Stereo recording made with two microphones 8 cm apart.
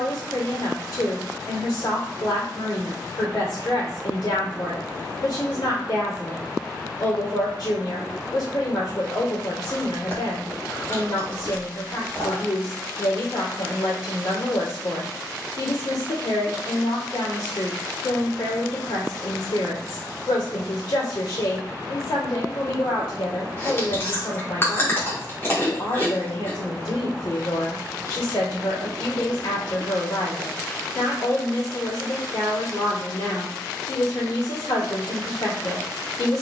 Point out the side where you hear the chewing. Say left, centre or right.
left.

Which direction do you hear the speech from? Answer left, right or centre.
left.